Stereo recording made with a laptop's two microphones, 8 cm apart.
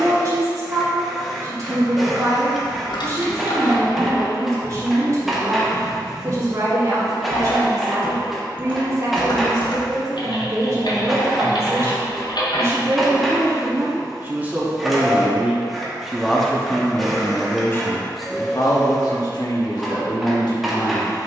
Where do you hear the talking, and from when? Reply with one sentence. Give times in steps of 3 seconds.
In this clip you hear the talking on the right from 0 s, in the centre from 15 s and on the left from 18 s.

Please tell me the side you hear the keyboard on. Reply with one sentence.
You can hear the keyboard on the left.